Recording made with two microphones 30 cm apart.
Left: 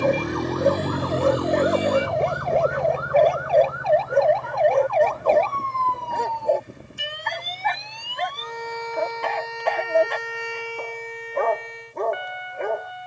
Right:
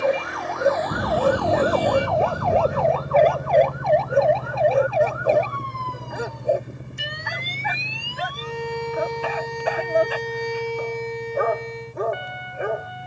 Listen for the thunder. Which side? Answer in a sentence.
You can hear the thunder on the right.